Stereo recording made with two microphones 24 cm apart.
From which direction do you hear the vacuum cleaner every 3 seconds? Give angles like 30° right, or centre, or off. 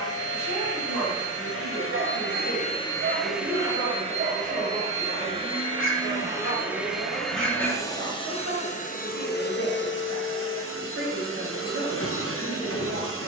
60° left, 20° right, 10° left, 60° left, 60° left.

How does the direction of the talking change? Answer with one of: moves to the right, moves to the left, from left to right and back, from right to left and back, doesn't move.
doesn't move.